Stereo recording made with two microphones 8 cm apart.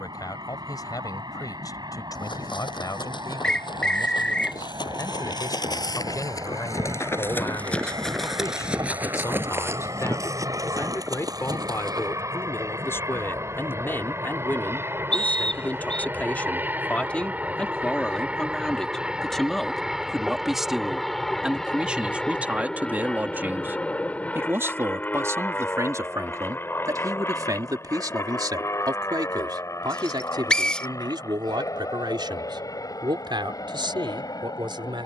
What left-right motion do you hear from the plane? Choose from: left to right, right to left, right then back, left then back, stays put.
right to left.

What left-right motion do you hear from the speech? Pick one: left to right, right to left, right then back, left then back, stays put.
left to right.